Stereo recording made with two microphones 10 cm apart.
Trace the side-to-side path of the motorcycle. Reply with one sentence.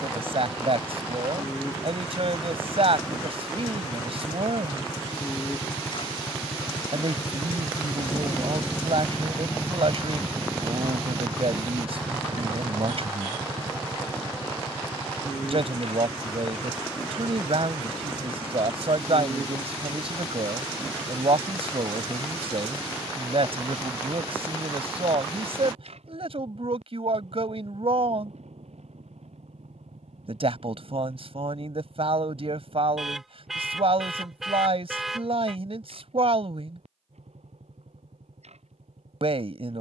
You can hear the motorcycle go from the left side to the right.